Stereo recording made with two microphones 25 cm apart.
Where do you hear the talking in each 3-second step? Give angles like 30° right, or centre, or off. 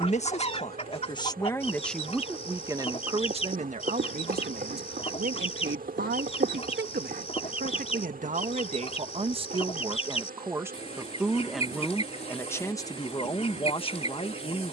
10° left, 40° right, 40° right, 10° right, 20° left.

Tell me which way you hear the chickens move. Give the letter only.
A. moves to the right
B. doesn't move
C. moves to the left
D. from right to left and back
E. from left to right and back
B.